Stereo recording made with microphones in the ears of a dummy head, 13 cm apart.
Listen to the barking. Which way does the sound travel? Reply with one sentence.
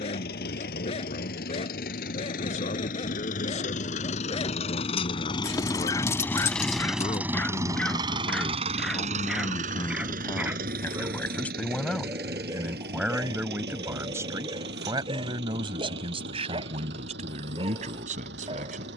You can hear the barking travel towards the right.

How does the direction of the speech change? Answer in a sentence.
In this clip you hear the speech go from the left side to the right.